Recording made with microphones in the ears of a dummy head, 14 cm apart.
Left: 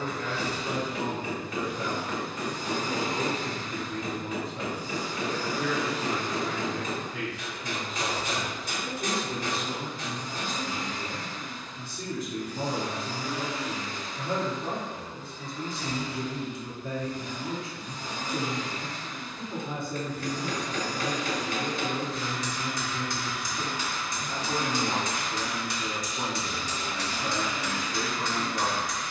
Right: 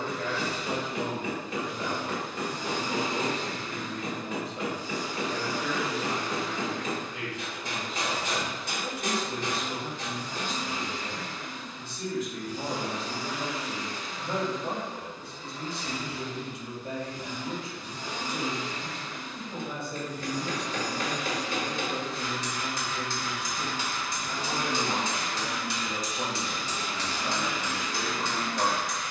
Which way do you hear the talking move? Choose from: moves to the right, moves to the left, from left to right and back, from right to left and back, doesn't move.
doesn't move.